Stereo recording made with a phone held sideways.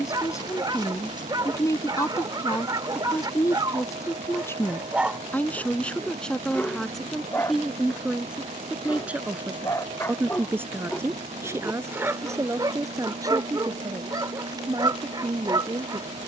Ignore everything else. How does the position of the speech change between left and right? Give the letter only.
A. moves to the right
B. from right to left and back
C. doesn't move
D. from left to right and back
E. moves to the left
A.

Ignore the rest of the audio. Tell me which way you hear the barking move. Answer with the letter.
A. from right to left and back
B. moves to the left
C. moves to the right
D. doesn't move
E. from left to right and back
A.